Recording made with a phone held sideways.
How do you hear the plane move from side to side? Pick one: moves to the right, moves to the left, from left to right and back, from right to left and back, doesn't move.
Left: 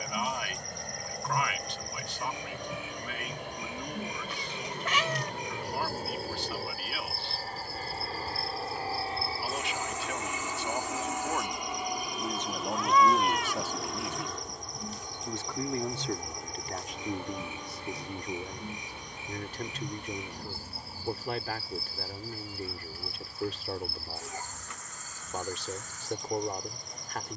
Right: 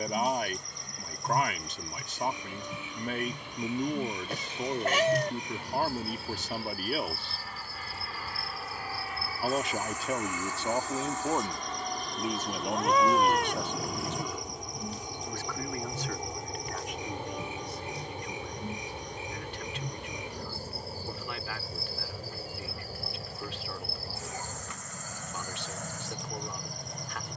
moves to the right.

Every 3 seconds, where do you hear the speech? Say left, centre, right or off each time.
right, right, right, right, centre, left, left, left, left.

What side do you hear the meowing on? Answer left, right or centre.
right.